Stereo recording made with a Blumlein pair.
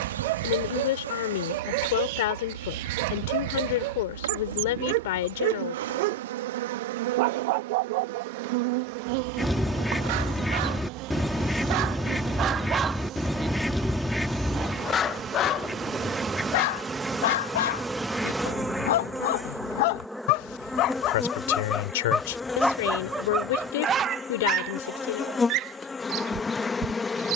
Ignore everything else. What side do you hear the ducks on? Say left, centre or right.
centre.